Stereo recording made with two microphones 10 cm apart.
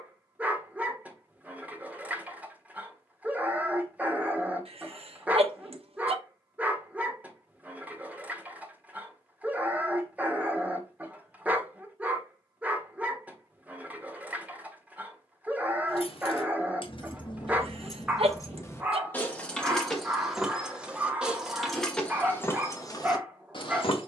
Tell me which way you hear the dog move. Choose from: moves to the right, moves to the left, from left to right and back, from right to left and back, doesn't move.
doesn't move.